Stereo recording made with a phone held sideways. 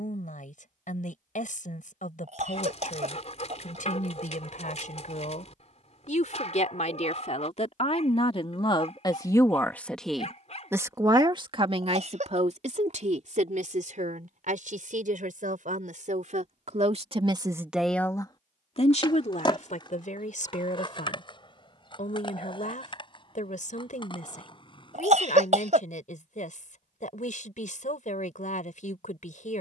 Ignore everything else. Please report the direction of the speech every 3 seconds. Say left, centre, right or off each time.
left, left, left, centre, right, right, left, left, left, left.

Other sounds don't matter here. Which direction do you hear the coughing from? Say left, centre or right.
right.